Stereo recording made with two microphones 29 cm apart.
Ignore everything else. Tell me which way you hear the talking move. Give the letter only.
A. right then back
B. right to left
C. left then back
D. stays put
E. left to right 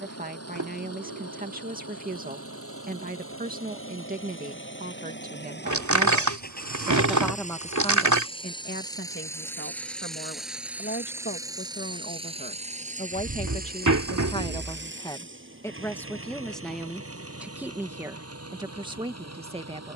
C.